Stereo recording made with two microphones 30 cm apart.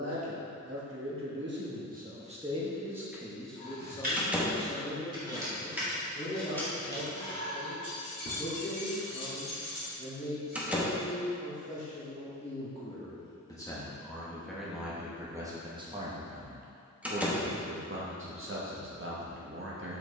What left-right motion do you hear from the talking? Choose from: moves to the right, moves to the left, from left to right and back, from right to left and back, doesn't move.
from right to left and back.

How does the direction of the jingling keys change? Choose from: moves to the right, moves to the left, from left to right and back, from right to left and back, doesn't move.
moves to the left.